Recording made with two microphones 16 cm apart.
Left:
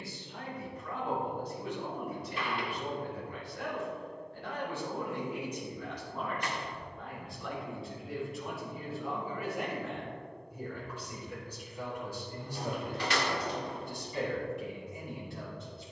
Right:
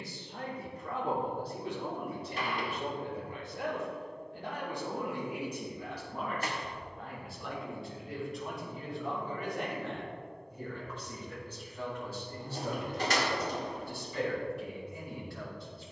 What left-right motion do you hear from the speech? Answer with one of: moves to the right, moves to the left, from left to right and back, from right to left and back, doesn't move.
moves to the left.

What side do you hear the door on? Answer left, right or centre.
right.